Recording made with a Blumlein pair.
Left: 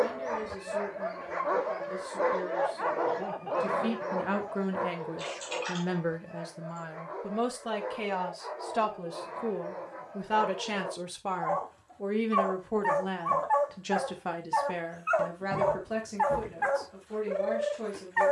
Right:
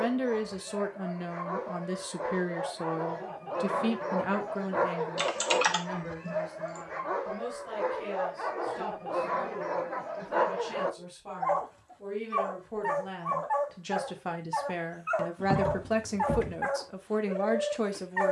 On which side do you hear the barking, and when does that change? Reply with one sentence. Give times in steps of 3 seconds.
In this clip you hear the barking on the left from 0 s, in the centre from 3 s, on the right from 6 s and in the centre from 12 s.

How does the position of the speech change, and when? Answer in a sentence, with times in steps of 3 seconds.
In this clip you hear the speech on the right from 0 s, in the centre from 3 s, on the left from 6 s, in the centre from 12 s and on the right from 15 s.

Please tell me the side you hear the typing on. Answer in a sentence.
You can hear the typing on the right.